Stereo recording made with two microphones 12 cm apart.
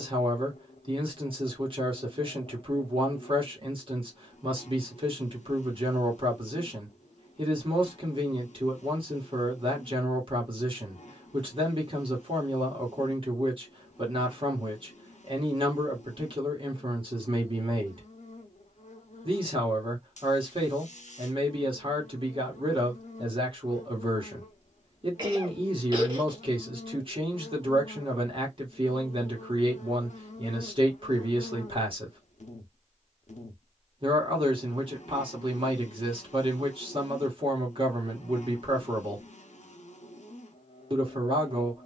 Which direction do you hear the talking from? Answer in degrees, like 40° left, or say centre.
50° right.